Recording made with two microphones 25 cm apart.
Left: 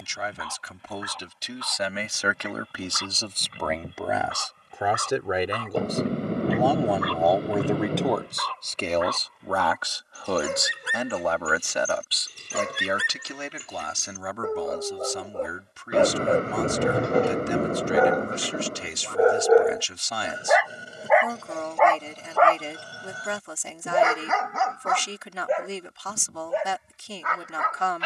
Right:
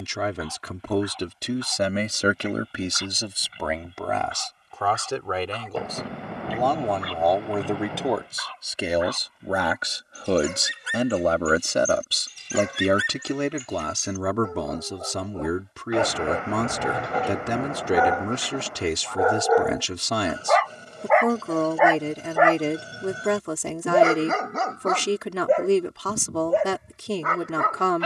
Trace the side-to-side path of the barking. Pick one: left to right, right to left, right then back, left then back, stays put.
left to right.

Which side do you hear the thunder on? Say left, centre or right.
left.